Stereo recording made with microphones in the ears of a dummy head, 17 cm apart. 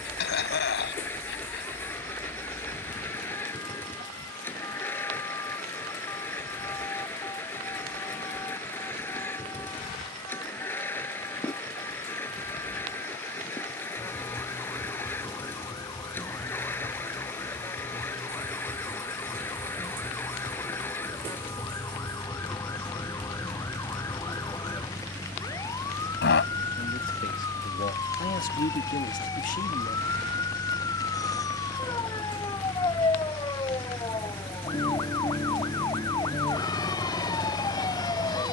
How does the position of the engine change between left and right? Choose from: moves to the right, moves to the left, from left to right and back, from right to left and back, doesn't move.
doesn't move.